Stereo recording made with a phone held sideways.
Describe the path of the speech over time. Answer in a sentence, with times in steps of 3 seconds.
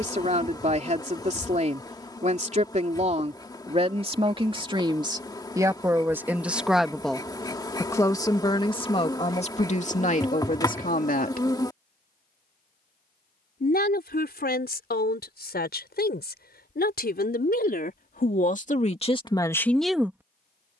In this clip you hear the speech on the right from 0 s, in the centre from 6 s and on the left from 9 s.